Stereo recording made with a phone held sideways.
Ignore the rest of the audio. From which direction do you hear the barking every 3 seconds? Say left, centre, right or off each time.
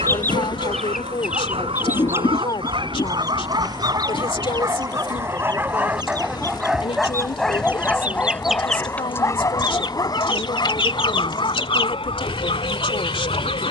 right, right, centre, left, left.